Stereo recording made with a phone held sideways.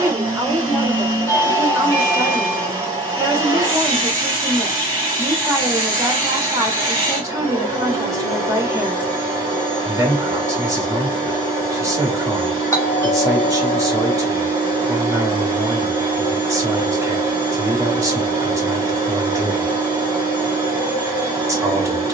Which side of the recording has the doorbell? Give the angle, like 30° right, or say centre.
20° left.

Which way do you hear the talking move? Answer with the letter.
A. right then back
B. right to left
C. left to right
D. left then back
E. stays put
E.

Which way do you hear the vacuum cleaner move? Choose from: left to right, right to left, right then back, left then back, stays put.
stays put.